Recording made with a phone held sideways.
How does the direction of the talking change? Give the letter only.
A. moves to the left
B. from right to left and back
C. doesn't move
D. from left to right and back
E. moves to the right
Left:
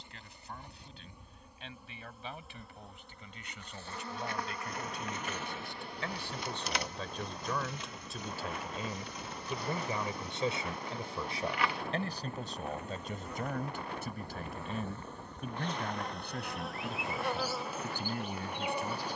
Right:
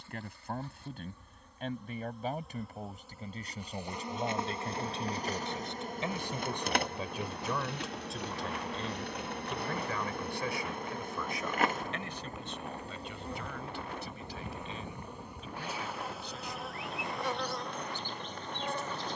A.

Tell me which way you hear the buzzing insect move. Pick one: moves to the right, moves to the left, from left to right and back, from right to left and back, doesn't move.
from left to right and back.